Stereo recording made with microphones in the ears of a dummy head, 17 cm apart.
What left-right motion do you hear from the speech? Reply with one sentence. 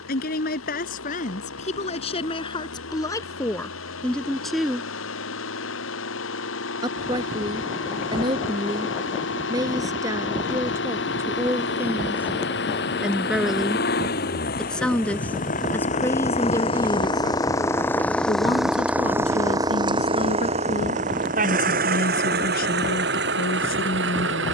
In this clip you hear the speech move from left to right and back again.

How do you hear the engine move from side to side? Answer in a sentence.
You can hear the engine move from left to right.